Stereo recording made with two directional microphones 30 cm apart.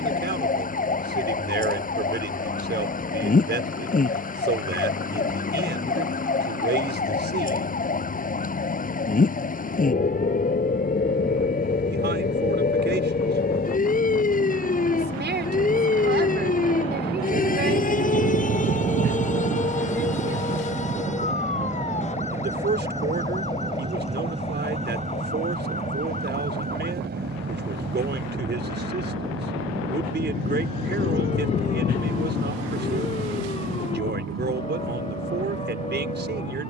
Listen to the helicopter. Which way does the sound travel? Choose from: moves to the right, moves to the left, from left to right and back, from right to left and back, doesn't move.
moves to the right.